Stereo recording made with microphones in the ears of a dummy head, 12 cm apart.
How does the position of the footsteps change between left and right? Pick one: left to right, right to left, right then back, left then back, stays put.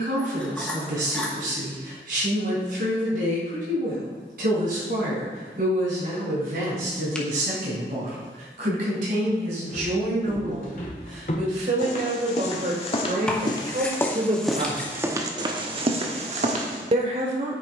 left to right.